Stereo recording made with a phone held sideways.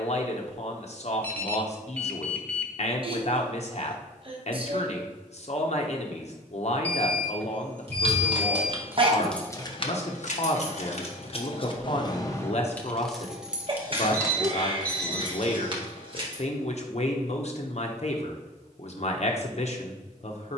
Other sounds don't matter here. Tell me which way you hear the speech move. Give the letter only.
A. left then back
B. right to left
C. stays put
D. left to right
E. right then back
C.